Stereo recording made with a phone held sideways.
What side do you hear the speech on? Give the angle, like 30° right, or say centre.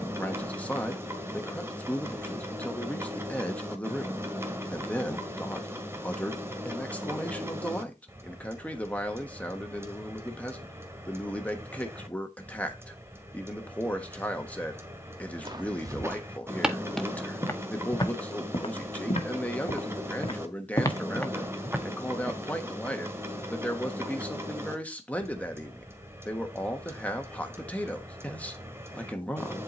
10° left.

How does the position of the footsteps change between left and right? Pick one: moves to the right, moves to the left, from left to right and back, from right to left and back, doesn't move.
from right to left and back.